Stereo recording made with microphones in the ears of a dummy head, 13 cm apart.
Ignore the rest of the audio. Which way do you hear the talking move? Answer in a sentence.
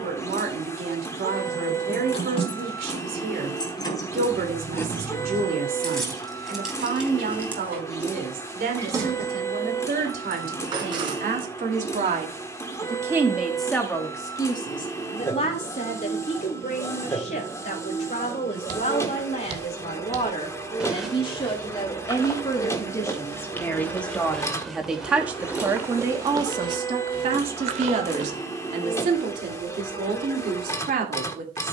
In this clip you hear the talking move from right to left and back again.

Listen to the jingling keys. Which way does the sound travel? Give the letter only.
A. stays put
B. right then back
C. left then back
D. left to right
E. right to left
D.